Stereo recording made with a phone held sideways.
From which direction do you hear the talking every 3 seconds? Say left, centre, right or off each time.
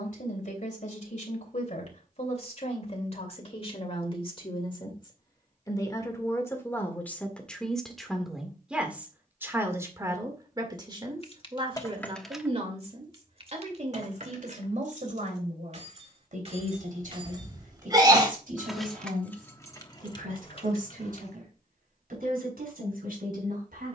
left, left, centre, right, right, right, right, right.